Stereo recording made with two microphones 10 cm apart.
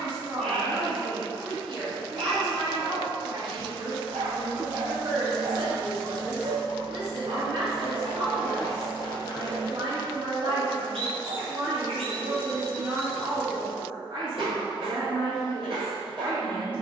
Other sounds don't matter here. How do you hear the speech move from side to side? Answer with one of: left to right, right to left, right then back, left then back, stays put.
stays put.